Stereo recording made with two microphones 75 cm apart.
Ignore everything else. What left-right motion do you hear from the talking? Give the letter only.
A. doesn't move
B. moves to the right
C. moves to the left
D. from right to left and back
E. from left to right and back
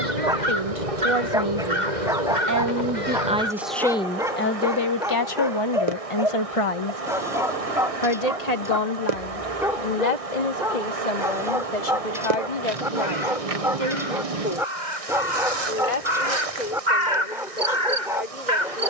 C.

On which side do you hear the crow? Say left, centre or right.
right.